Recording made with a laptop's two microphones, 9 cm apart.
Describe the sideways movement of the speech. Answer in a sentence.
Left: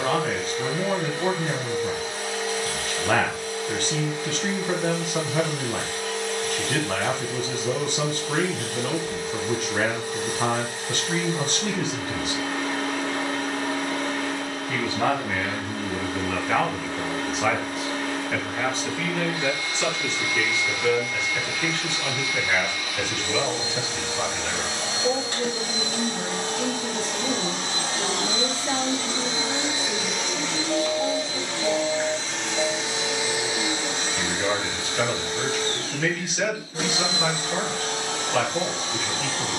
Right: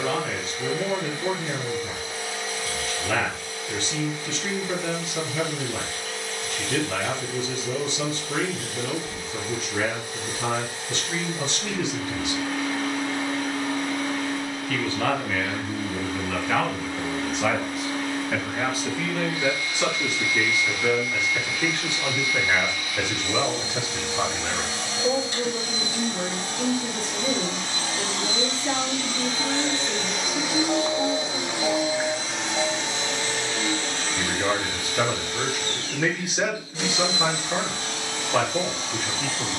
In this clip you hear the speech go from the left side to the right.